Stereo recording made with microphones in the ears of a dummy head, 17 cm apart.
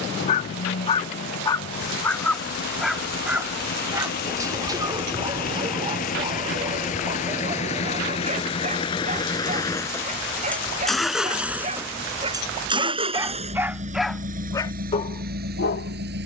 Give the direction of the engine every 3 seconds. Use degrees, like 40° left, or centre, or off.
60° left, 50° left, 40° left, 10° left, 40° right, 60° right.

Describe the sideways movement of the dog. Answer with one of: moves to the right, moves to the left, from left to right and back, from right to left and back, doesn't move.
from left to right and back.